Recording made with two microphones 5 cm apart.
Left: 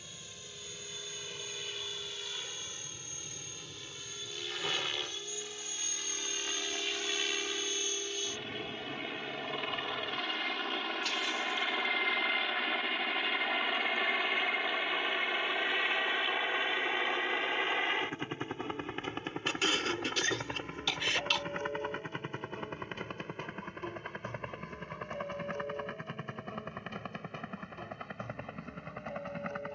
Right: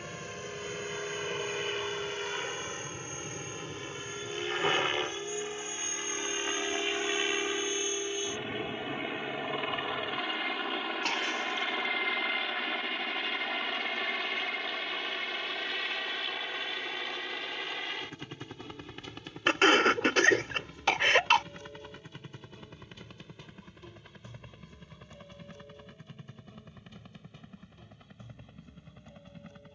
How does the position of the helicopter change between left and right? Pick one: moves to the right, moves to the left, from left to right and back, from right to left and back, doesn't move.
moves to the left.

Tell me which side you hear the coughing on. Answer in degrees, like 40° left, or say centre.
50° right.